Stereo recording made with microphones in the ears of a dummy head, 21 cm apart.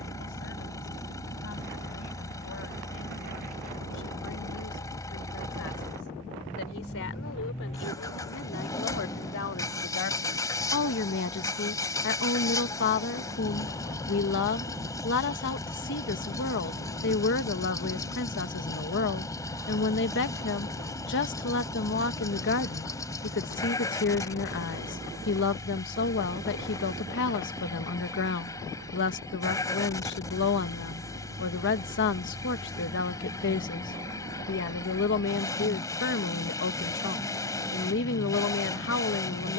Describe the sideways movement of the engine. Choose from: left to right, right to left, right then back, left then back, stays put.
stays put.